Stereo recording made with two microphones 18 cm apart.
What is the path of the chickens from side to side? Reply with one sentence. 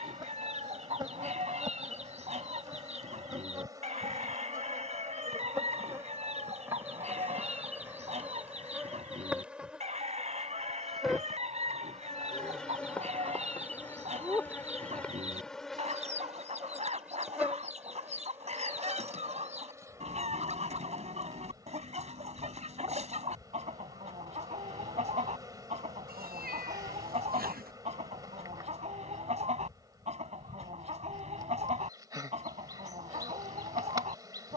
You can hear the chickens stay put.